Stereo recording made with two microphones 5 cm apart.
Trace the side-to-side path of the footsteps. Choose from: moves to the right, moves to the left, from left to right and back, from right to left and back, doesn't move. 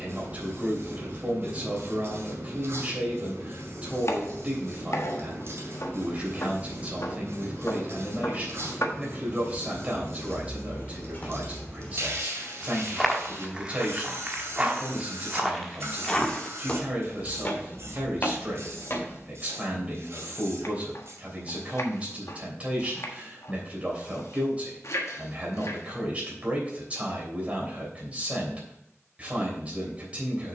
from left to right and back.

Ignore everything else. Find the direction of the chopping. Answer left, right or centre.
left.